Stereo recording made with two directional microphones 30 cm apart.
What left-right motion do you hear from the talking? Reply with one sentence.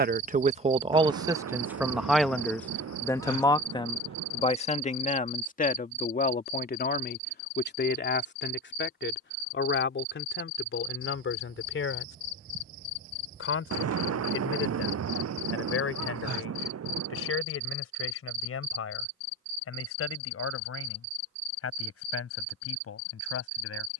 In this clip you hear the talking go from the right side to the left.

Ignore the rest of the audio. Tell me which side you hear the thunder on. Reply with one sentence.
You can hear the thunder on the right.